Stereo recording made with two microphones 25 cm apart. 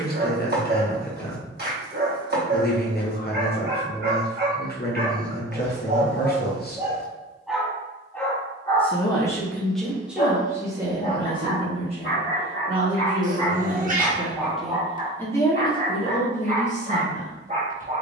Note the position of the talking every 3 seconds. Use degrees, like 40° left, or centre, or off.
40° left, 40° left, 40° left, 10° right, 10° right, 20° left.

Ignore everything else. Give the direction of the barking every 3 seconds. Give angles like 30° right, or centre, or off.
40° right, 40° right, centre, 40° left, 20° left, 30° right.